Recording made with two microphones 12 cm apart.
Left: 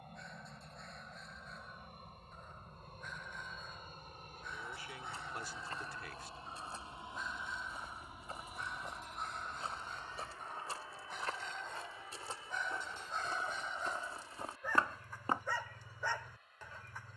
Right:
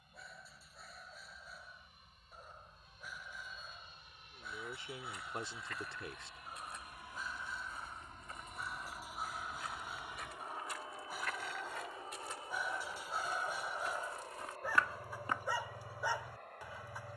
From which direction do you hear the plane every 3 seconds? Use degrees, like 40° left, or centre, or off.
60° left, 50° left, 20° left, 20° right, 40° right, 50° right.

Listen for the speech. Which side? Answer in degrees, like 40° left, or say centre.
30° right.